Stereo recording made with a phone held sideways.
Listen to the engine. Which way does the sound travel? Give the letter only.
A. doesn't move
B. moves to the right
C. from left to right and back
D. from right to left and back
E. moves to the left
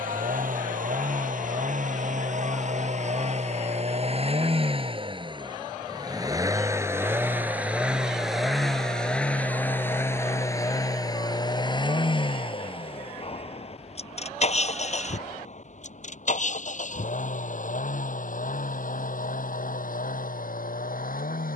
E.